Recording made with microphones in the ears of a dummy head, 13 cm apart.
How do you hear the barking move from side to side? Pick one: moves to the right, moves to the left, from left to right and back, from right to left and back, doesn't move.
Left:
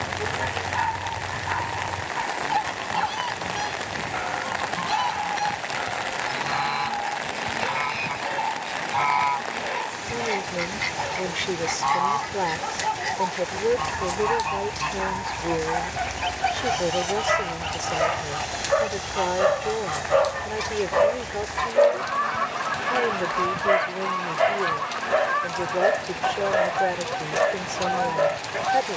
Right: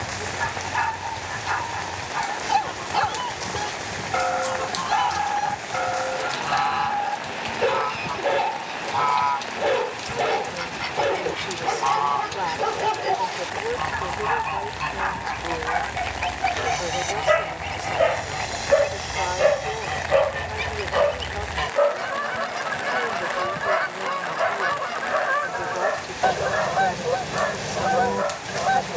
moves to the left.